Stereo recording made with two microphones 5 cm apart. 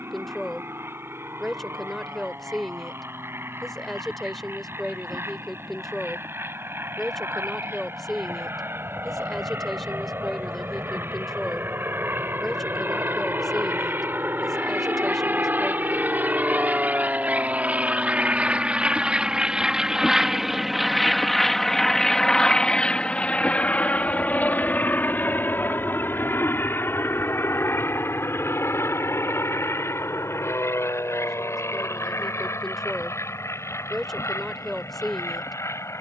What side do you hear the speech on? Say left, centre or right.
centre.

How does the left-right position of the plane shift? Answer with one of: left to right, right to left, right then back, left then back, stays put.
right to left.